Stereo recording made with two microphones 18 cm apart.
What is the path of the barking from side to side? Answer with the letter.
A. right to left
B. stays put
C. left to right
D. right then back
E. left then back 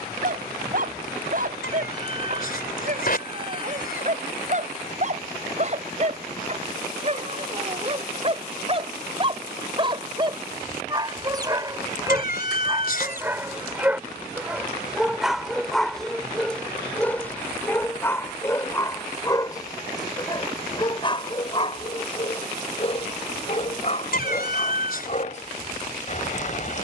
A.